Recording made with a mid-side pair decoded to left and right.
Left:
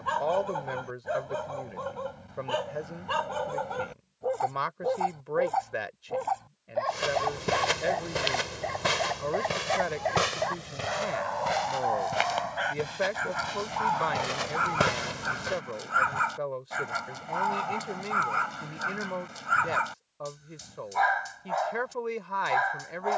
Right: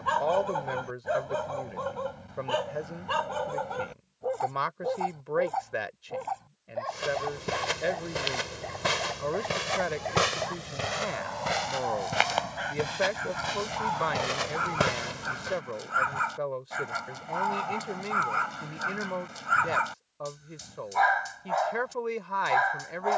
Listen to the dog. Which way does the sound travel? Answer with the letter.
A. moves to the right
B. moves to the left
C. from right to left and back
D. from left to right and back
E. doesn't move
C.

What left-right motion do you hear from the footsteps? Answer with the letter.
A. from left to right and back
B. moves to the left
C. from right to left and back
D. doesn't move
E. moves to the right
A.